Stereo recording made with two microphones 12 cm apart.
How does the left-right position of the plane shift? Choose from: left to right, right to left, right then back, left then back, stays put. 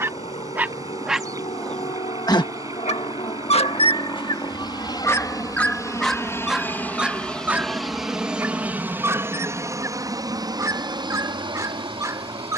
left to right.